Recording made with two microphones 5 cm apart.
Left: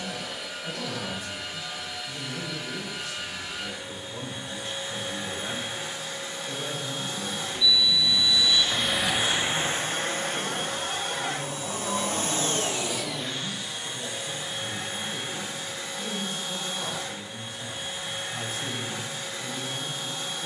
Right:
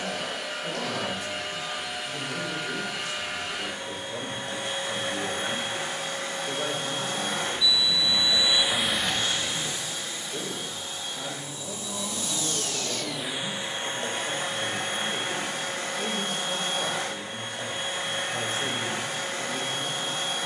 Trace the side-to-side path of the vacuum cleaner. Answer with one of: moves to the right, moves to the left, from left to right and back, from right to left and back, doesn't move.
from right to left and back.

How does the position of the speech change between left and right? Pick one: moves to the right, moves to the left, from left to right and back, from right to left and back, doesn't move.
doesn't move.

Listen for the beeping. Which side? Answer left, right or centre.
centre.